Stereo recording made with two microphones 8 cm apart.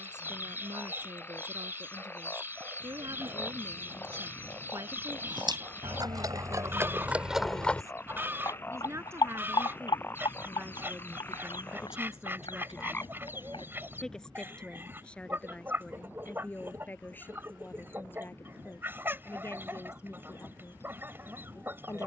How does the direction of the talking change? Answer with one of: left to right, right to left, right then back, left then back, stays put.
right to left.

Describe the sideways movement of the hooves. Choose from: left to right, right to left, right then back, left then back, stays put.
right to left.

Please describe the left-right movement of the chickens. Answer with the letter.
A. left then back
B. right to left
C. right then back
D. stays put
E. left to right
D.